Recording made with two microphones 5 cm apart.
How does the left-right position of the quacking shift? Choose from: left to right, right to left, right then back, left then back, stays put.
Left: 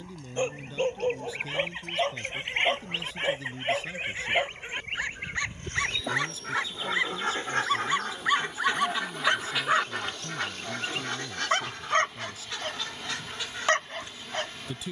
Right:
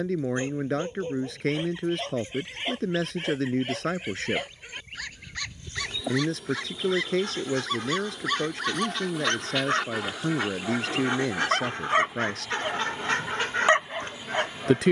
left to right.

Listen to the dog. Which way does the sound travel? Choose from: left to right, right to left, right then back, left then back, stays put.
left to right.